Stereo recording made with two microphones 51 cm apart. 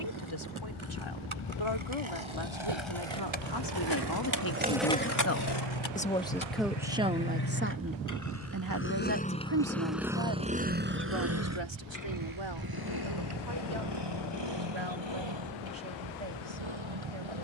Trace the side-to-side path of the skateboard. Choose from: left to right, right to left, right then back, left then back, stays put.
right to left.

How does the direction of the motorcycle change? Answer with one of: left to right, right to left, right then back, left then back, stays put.
left to right.